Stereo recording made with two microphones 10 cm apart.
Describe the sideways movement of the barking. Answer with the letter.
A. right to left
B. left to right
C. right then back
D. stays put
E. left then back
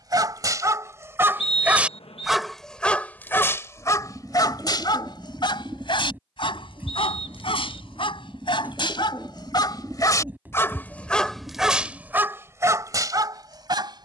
E.